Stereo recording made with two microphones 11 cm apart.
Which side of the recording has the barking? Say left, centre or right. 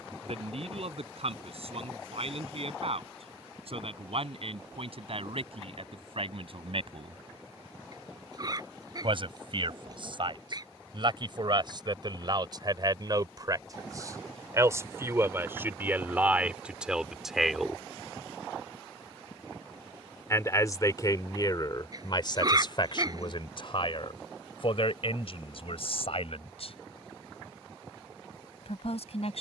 right.